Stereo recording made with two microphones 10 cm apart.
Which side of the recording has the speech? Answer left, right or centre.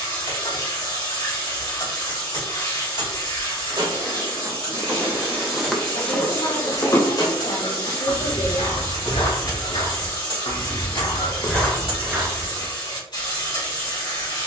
left.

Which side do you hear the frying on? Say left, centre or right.
left.